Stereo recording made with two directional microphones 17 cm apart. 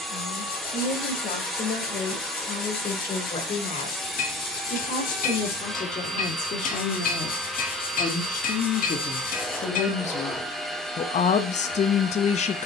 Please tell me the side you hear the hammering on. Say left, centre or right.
left.